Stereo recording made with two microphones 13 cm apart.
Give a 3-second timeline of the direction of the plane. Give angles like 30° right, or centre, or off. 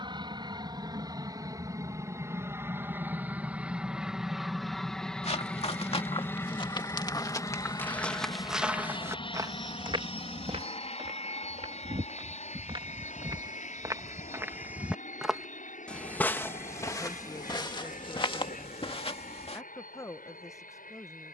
30° right, centre, 30° left, 40° left, 60° left, 60° left, 70° left.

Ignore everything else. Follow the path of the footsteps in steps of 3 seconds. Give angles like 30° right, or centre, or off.
off, 50° left, 20° left, 40° right, 30° right, 20° left, 40° left.